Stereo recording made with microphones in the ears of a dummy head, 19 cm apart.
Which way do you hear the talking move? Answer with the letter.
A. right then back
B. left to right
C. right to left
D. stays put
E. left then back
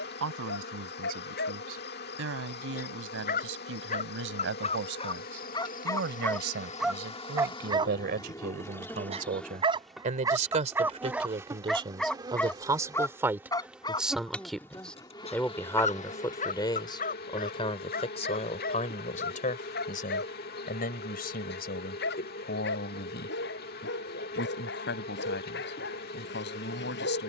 C.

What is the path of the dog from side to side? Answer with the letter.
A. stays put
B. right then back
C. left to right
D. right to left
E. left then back
B.